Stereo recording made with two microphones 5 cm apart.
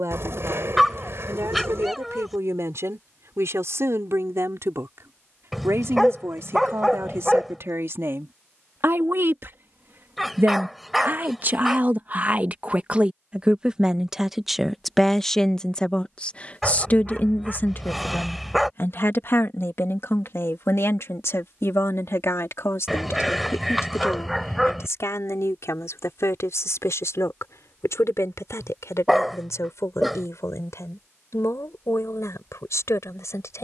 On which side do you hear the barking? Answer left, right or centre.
centre.